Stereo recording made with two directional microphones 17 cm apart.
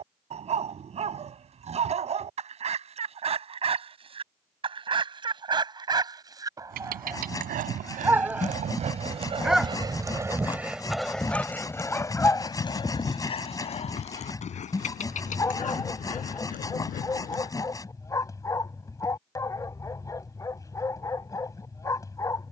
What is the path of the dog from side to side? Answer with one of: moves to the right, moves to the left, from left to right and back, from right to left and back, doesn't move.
moves to the left.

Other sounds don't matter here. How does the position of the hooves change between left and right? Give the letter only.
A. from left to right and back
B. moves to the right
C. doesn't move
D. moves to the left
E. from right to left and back
D.